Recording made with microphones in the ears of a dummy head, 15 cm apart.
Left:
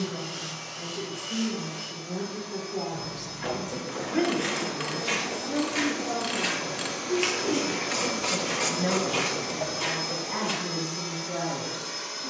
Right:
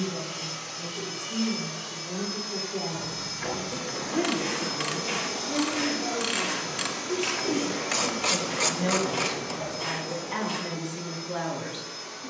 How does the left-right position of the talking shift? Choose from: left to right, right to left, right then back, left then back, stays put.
left to right.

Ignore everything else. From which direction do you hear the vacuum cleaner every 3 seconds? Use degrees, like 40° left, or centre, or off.
60° right, 40° right, centre, 40° left.